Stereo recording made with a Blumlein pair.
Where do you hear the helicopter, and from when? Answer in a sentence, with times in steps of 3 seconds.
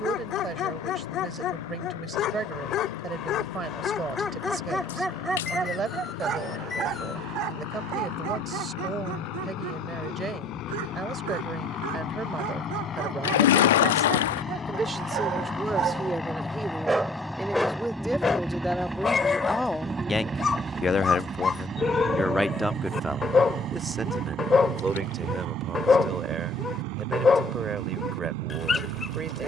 In this clip you hear the helicopter on the left from 0 s, in the centre from 15 s and on the right from 21 s.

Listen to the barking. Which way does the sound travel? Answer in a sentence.
You can hear the barking move from left to right and back again.